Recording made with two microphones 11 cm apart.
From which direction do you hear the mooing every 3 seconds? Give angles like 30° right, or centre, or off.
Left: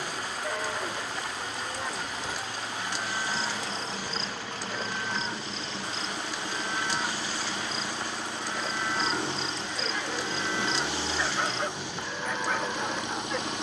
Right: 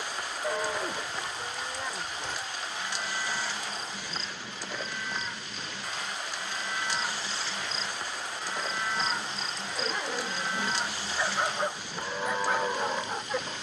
centre, 30° left, 10° left, 10° right, 20° right.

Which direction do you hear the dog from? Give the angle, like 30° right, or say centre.
10° right.